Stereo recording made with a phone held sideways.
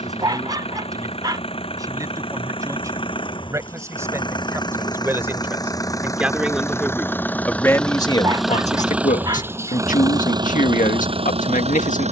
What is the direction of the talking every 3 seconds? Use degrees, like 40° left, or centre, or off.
30° right, 20° right, 20° left, 80° left.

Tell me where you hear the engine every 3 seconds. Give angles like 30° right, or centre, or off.
40° left, 30° left, 10° left, 30° right.